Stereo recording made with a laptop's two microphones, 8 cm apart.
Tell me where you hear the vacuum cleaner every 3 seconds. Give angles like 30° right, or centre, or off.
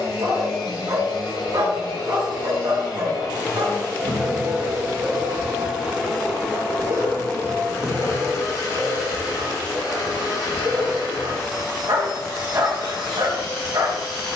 70° left, centre, 30° left, 60° left, 70° left.